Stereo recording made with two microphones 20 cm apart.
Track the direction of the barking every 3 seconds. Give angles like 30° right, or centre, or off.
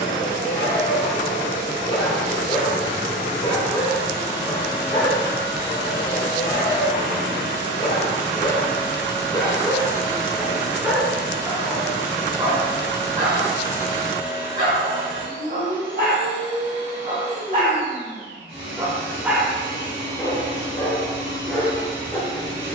30° left, 30° left, 30° left, centre, 40° right, 50° right, 10° left, 20° left.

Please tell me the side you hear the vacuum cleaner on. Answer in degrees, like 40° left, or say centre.
80° right.